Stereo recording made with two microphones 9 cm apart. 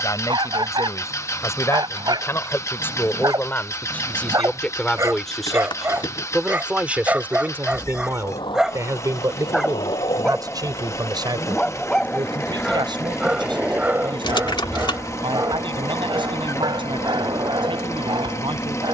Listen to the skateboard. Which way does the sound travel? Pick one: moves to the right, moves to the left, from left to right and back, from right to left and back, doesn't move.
moves to the right.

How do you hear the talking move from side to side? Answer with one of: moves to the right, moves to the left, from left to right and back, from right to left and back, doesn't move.
moves to the right.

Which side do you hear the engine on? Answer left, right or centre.
left.